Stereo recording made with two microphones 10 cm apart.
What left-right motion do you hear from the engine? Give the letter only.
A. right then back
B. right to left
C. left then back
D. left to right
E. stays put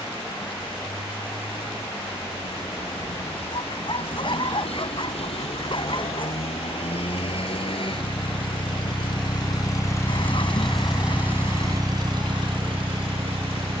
D.